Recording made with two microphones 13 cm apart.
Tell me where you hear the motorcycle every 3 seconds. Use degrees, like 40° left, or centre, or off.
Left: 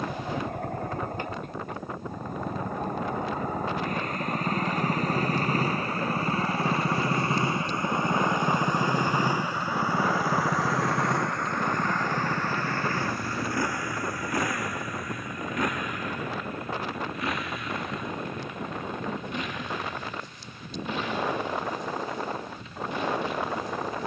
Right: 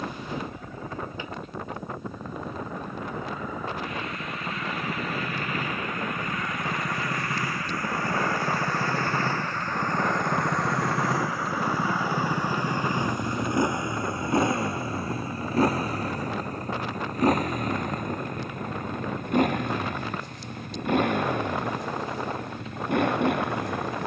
60° left, 40° left, 30° left, centre, 20° right, 40° right, 50° right, 60° right.